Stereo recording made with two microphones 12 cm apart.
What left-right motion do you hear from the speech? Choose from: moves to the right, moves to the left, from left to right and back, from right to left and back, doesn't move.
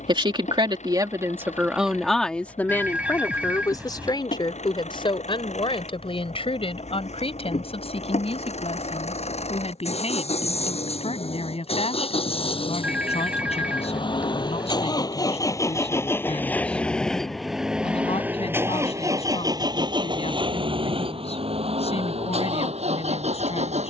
moves to the left.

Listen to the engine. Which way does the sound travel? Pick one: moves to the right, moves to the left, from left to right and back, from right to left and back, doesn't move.
moves to the right.